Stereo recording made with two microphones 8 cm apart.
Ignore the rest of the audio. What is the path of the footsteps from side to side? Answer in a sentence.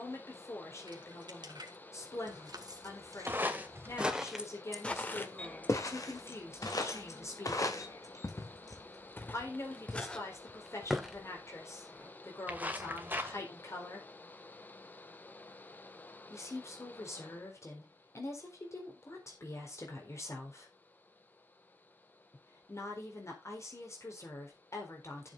In this clip you hear the footsteps move from right to left and back again.